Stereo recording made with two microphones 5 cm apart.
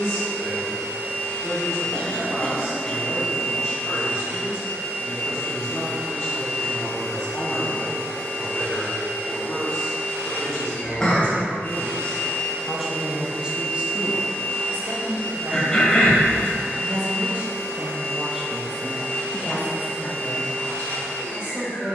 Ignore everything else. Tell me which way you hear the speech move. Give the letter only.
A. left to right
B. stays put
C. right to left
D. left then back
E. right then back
E.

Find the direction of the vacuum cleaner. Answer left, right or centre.
left.